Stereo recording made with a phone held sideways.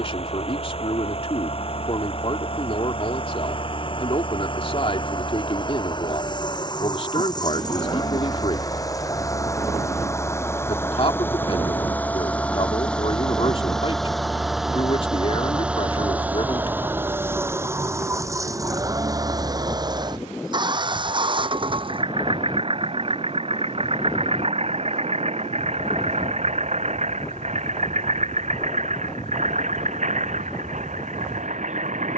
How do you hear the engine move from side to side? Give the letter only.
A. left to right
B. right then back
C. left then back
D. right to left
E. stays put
A.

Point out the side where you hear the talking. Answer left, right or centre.
left.